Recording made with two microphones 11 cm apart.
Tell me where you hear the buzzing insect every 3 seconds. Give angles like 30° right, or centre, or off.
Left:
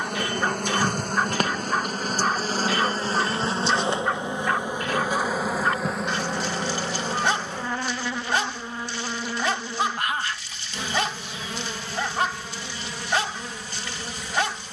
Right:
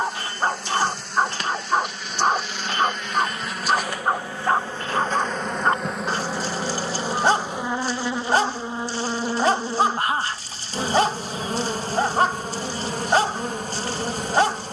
50° left, 20° left, 20° right, 40° right, 50° right.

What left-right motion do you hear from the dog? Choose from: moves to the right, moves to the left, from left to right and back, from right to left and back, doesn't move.
doesn't move.